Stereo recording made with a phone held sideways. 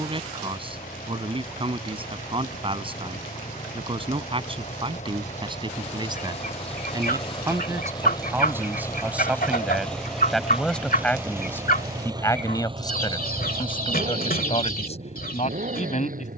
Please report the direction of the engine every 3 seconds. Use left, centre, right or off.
left, left, left, centre, right, right.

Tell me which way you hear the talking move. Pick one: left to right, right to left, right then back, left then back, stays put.
right to left.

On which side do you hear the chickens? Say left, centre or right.
left.